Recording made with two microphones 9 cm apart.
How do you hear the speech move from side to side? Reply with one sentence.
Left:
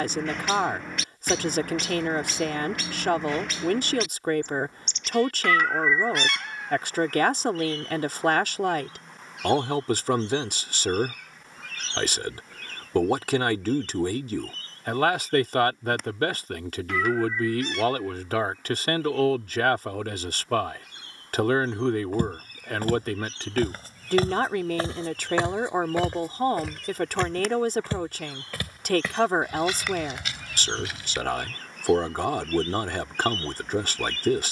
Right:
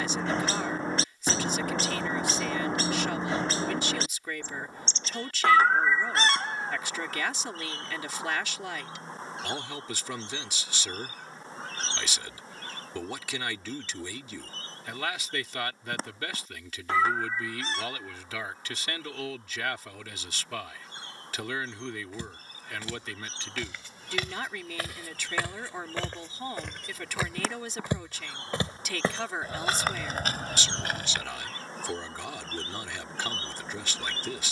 You can hear the speech stay in one place.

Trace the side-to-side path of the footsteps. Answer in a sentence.
In this clip you hear the footsteps go from the left side to the right.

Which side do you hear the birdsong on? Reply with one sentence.
You can hear the birdsong on the right.